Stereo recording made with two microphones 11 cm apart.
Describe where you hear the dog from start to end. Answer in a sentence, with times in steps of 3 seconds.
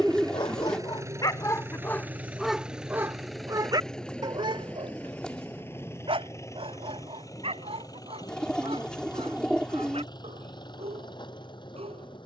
You can hear the dog on the left from 0 s and on the right from 3 s.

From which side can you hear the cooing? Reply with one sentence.
In this clip you hear the cooing in the centre.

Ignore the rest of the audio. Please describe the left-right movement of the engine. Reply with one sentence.
In this clip you hear the engine move from right to left.